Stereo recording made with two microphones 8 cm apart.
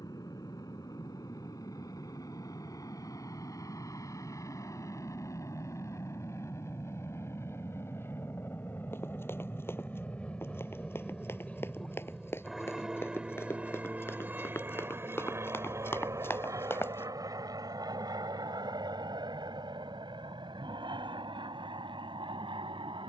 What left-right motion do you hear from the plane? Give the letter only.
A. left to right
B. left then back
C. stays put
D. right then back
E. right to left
A.